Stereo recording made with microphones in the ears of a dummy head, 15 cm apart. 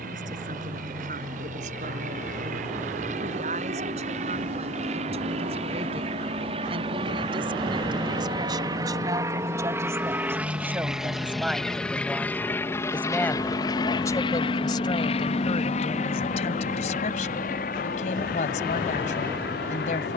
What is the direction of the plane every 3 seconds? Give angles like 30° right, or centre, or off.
50° right, 50° right, 30° right, 10° right, 20° left, 50° left, 60° left.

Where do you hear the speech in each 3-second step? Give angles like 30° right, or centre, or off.
50° right, 40° right, 30° right, 10° right, 20° left, 40° left, 50° left.